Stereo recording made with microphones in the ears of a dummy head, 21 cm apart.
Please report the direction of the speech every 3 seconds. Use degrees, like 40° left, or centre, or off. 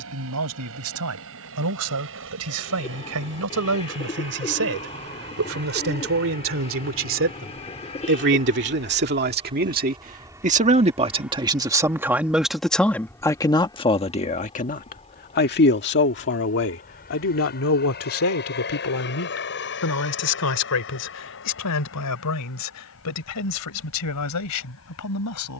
70° right, 60° right, 50° right, 30° right, 20° left, 50° left, 70° left, 80° left, 80° left.